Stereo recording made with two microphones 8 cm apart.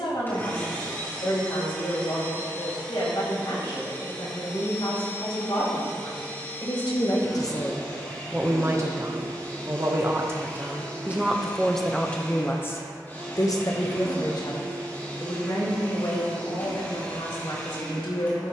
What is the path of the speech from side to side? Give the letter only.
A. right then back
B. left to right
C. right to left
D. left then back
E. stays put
A.